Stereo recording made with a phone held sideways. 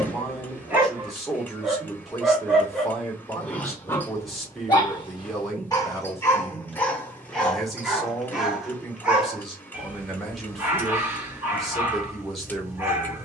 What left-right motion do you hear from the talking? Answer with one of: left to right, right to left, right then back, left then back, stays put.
stays put.